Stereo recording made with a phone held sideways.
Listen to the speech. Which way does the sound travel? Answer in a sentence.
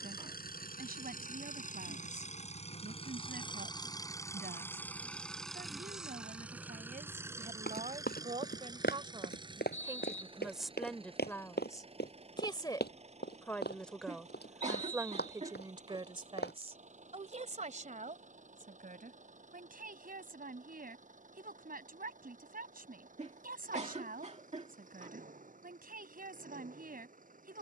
In this clip you hear the speech go left and come back.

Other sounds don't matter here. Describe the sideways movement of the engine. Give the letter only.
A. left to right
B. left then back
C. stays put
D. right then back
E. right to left
A.